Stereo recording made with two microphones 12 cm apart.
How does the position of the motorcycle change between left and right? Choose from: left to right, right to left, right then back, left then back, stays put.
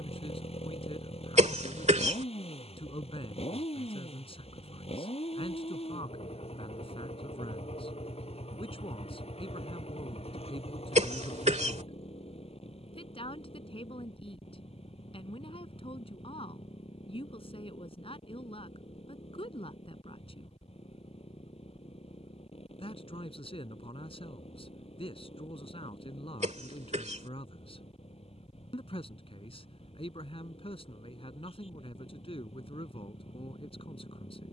stays put.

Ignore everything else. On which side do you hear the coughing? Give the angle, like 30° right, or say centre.
70° right.